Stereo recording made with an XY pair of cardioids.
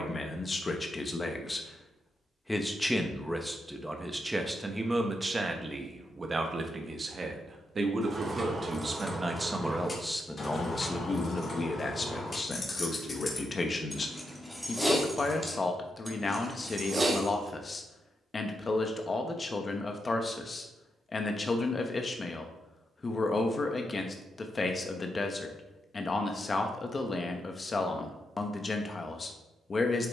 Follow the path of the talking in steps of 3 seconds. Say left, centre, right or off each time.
left, centre, right, centre, left, left, left, left, left, left.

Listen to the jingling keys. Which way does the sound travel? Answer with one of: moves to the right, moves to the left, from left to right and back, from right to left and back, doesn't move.
from right to left and back.